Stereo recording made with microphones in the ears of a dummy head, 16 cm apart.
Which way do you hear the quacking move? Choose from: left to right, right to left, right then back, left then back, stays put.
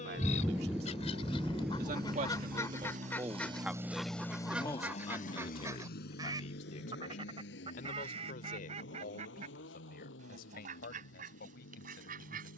left to right.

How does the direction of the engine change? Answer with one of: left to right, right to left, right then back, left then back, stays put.
right to left.